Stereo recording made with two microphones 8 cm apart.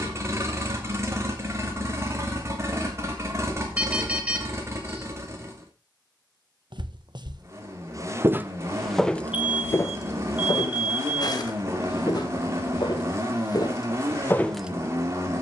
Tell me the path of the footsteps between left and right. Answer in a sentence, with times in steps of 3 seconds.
You can hear the footsteps not at all from 0 s, on the right from 6 s and on the left from 9 s.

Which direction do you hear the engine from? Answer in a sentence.
You can hear the engine on the right.